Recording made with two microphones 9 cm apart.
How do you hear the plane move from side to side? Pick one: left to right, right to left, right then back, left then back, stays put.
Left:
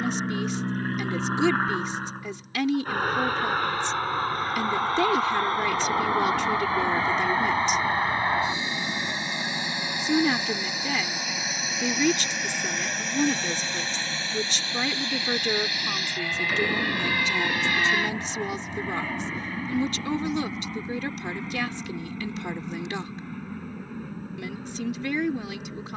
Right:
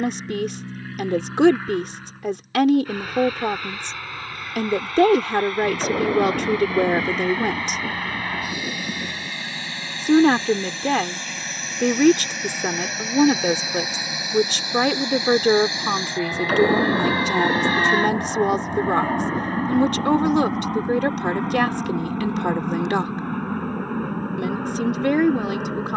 left to right.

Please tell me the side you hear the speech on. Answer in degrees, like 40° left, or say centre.
60° right.